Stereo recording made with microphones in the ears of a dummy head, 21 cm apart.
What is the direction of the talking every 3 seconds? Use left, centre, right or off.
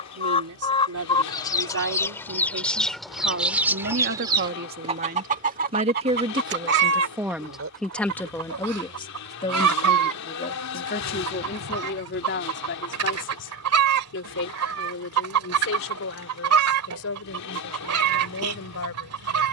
right, right, centre, left, left, left, left.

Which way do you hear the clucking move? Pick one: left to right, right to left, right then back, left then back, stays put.
left to right.